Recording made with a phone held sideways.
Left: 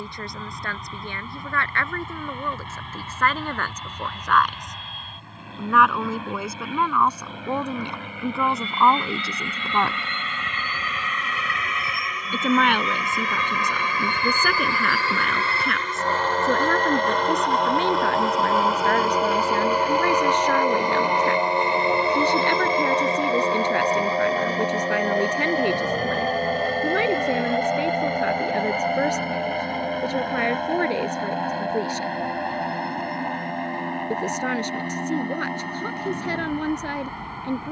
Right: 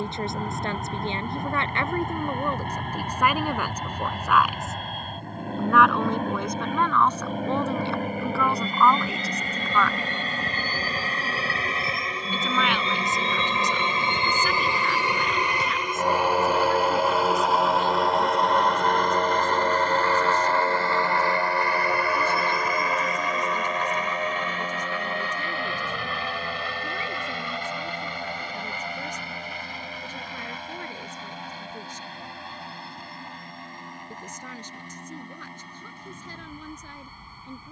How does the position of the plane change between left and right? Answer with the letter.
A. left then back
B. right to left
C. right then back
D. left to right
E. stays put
B.